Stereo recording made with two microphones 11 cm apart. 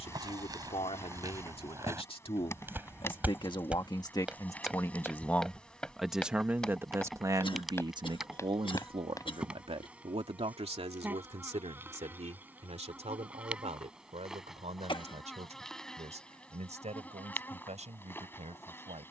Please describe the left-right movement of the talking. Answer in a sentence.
In this clip you hear the talking move from left to right.